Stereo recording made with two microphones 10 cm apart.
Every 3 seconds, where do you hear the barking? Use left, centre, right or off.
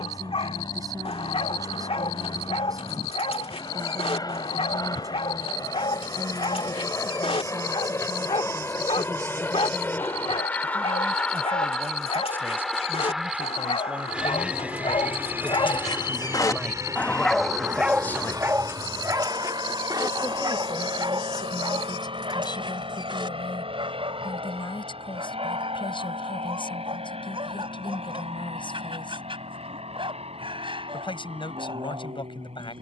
left, left, left, left, left, left, right, right, right, right, right.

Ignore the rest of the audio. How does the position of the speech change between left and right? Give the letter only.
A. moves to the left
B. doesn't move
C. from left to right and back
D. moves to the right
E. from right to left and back
A.